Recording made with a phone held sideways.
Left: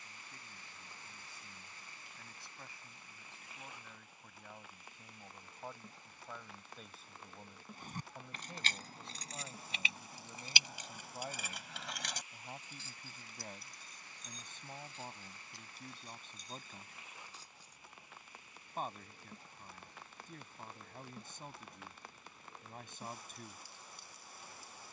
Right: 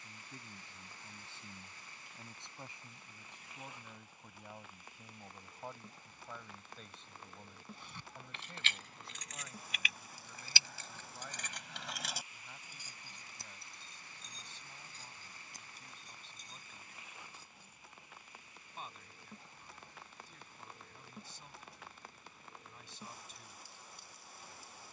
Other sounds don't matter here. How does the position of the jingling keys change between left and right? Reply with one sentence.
You can hear the jingling keys move to the right.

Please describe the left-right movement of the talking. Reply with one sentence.
In this clip you hear the talking travel towards the left.